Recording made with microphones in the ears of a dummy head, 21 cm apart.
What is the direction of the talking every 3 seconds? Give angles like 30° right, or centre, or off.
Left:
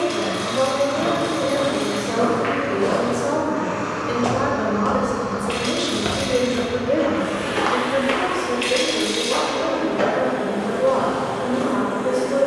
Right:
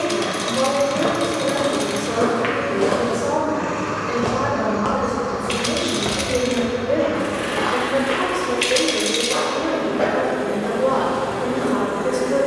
20° right, 20° left, centre, 30° right.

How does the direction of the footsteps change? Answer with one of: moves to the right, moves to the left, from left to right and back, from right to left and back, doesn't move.
moves to the left.